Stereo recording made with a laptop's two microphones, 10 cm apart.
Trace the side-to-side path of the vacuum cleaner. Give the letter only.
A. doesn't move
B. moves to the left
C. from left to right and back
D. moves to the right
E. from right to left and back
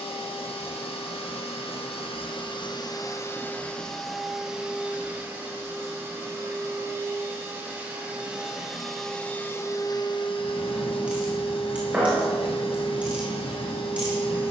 C.